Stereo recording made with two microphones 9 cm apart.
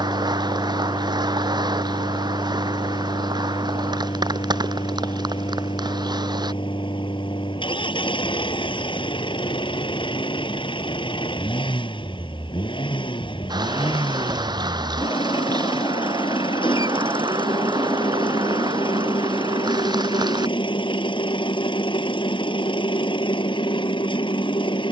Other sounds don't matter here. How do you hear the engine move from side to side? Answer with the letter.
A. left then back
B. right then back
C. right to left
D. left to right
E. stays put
E.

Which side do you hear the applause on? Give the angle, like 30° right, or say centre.
60° right.